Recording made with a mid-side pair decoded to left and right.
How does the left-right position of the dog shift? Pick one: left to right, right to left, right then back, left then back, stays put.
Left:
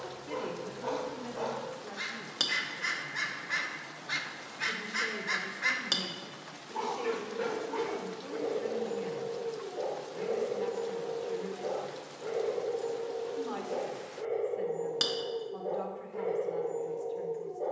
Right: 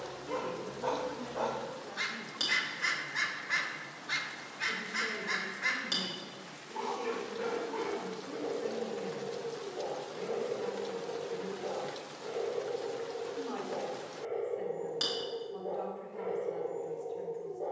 right to left.